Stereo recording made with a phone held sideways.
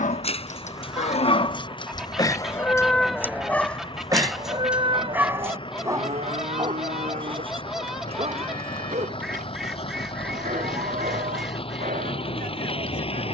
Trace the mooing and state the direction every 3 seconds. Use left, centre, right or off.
left, right, right, right, right.